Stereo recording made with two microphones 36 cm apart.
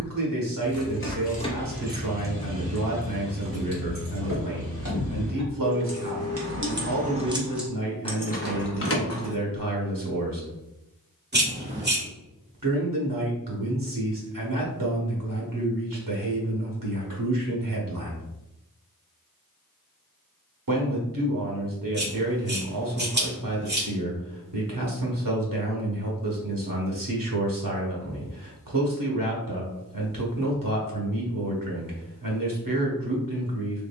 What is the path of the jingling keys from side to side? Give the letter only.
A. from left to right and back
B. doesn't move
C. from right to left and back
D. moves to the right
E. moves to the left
A.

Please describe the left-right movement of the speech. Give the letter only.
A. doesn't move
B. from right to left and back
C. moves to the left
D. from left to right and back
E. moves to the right
A.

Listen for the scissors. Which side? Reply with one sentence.
You can hear the scissors on the right.